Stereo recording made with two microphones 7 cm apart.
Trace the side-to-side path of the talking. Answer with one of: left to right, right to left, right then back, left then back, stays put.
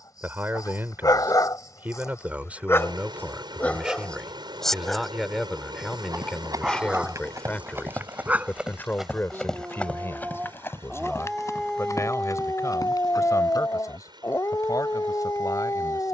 right to left.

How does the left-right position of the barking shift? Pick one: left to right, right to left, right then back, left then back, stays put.
right then back.